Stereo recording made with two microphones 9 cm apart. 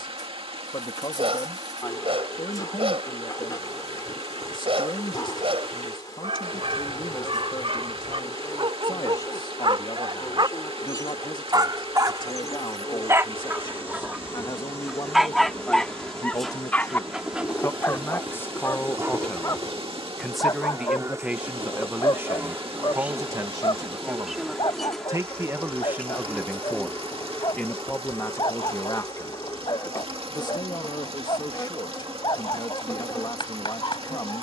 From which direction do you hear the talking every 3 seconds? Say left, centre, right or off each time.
left, left, left, left, left, left, centre, right, right, left, left, left.